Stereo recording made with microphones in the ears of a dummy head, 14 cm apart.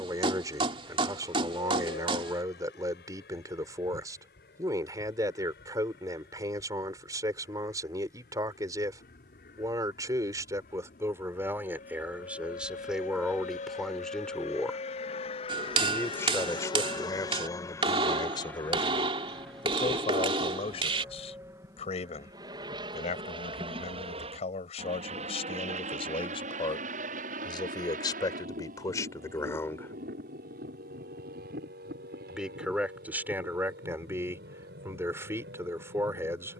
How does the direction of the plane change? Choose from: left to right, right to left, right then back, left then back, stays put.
left to right.